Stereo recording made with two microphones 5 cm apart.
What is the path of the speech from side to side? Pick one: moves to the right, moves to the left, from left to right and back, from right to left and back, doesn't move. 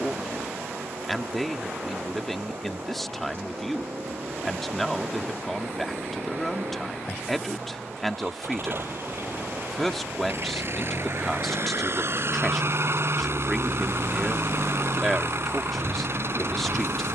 doesn't move.